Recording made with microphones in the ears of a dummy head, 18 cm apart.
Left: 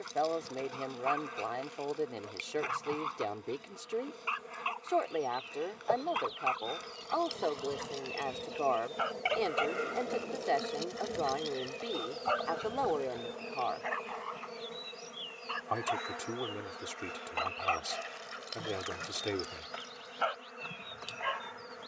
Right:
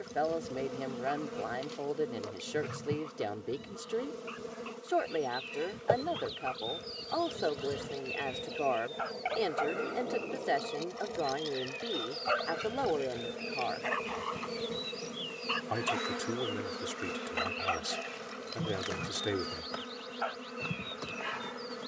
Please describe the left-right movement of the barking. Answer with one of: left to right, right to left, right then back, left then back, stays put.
right then back.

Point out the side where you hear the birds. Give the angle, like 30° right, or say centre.
20° right.